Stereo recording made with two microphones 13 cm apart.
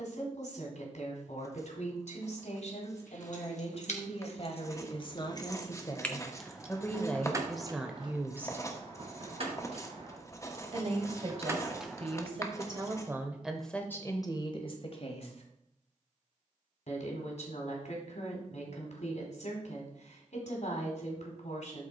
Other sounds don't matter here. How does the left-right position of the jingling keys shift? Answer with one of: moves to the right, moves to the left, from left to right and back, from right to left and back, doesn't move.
from left to right and back.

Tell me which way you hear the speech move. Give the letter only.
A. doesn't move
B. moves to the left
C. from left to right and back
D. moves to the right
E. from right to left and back
C.